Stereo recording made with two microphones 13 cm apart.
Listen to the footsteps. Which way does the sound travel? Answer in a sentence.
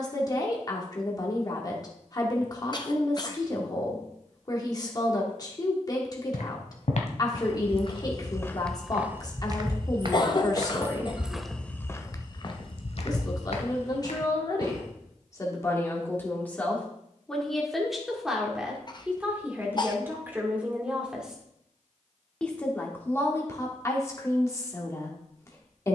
In this clip you hear the footsteps move from left to right and back again.